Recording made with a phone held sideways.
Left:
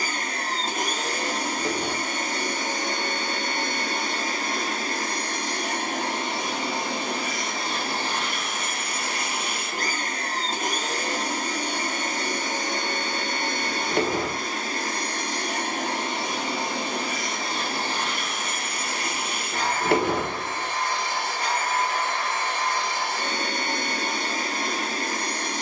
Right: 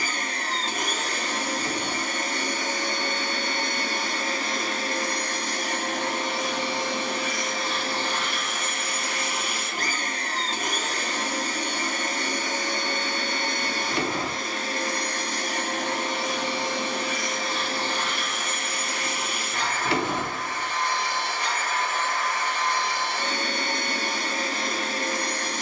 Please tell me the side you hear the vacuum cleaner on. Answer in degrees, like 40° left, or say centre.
50° left.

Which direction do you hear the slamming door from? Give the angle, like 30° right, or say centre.
50° left.